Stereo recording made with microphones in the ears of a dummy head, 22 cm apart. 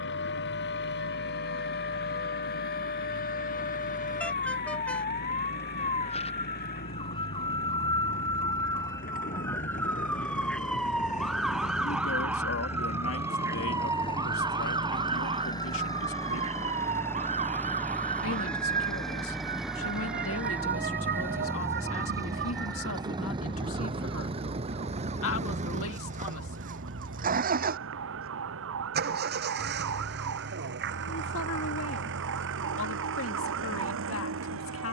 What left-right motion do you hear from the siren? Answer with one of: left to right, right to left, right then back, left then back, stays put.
left to right.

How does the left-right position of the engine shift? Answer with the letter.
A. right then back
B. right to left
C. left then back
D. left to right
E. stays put
D.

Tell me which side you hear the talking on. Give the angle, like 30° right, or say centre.
60° left.